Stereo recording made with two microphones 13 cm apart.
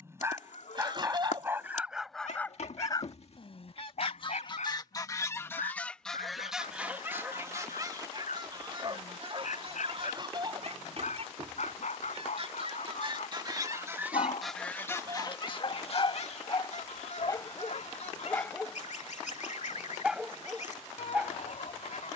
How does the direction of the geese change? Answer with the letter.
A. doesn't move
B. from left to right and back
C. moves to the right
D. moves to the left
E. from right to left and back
B.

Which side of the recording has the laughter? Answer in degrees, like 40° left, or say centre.
40° right.